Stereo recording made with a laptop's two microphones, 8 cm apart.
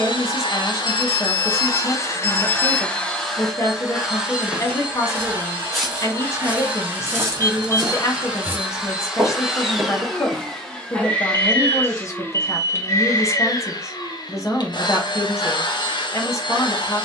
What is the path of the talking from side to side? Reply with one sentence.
In this clip you hear the talking stay in one place.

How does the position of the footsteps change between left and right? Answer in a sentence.
In this clip you hear the footsteps move from left to right and back again.